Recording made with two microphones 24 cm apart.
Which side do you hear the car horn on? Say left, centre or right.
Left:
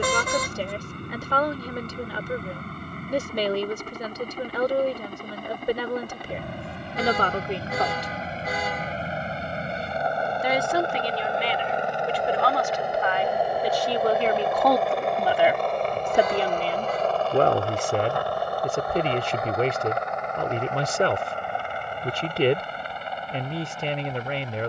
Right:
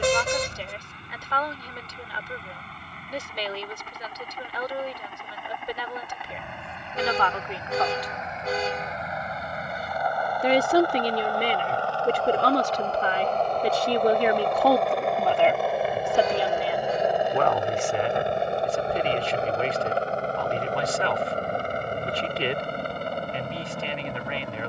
right.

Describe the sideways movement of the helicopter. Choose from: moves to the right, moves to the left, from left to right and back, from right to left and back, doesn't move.
moves to the right.